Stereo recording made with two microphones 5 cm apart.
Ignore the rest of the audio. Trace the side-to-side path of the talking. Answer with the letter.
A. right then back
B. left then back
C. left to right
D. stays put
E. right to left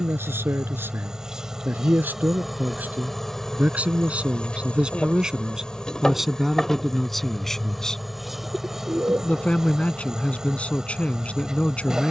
E.